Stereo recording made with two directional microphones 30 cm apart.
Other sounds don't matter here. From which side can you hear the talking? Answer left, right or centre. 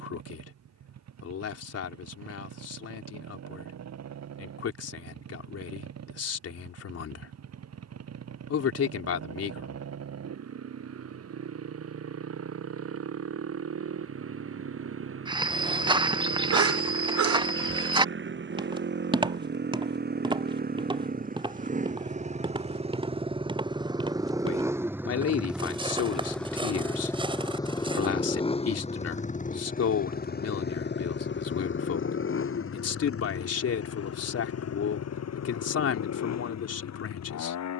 left.